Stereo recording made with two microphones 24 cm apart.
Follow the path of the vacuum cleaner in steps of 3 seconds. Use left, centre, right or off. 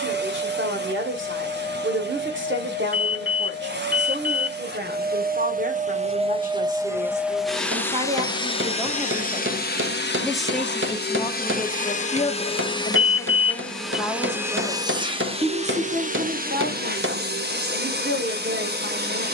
right, right, centre, left, centre, right, right.